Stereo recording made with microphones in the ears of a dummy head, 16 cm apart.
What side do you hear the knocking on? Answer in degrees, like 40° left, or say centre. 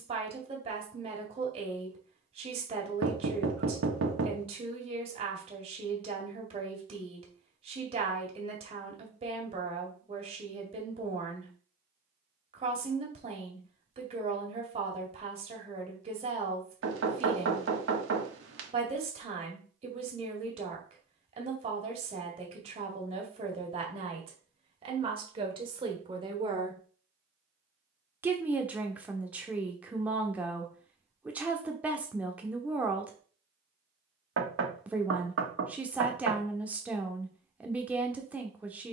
80° right.